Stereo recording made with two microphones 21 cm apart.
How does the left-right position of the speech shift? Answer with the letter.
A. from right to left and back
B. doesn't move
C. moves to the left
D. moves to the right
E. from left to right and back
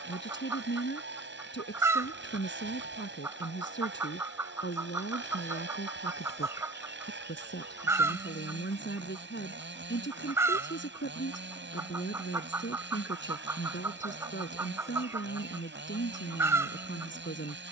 B.